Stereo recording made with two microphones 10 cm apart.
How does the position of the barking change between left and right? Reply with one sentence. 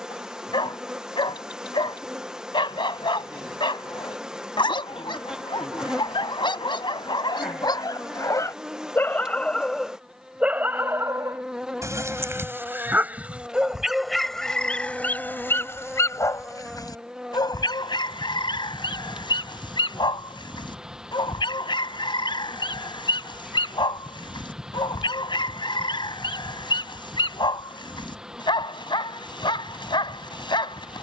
In this clip you hear the barking go right and come back.